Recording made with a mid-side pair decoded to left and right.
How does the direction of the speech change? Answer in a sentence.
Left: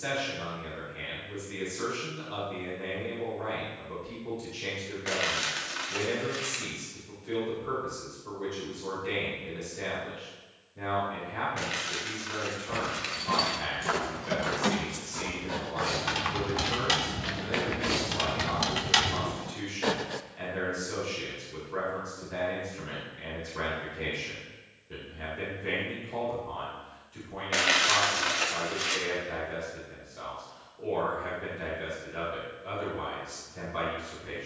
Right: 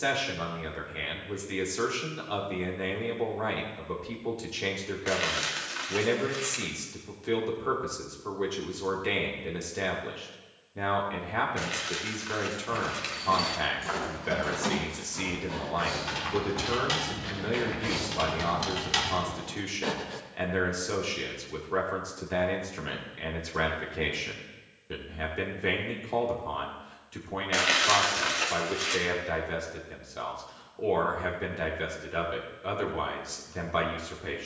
In this clip you hear the speech stay put.